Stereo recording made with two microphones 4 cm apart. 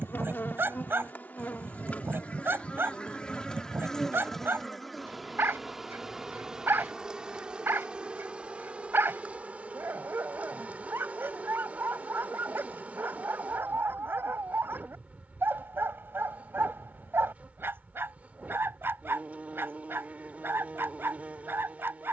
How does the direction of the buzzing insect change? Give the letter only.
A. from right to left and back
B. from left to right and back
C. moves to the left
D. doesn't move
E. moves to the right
E.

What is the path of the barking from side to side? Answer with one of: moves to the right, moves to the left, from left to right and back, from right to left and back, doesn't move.
doesn't move.